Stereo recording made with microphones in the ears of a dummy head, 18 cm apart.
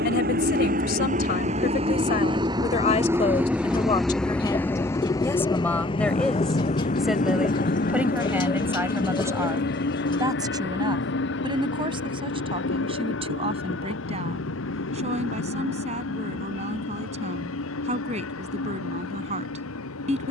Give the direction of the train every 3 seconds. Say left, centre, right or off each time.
right, centre, left, left, left, left, left.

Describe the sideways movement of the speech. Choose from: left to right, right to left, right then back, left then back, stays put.
left to right.